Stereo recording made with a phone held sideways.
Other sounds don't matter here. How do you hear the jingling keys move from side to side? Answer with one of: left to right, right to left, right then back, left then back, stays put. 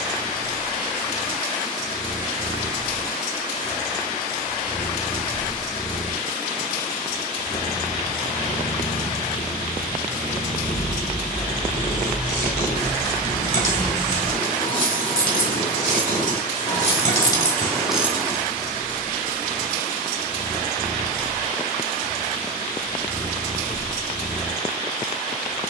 left then back.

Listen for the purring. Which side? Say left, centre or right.
right.